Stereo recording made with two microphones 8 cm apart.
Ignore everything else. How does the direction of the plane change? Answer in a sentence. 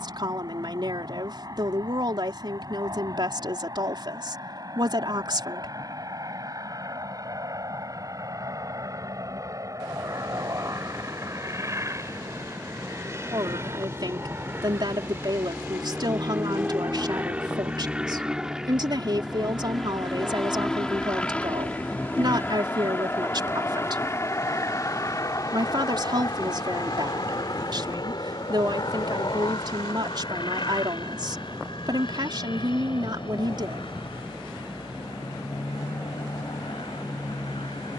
In this clip you hear the plane travel towards the left.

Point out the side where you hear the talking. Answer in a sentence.
You can hear the talking on the right.